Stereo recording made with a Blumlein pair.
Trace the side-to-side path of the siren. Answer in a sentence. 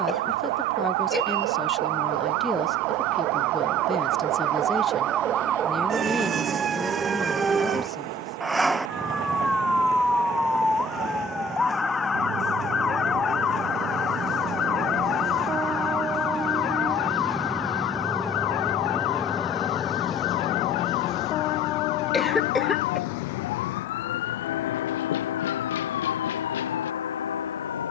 In this clip you hear the siren travel towards the left.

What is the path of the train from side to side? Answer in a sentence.
In this clip you hear the train go from the right side to the left.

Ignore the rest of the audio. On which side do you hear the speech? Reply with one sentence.
You can hear the speech in the centre.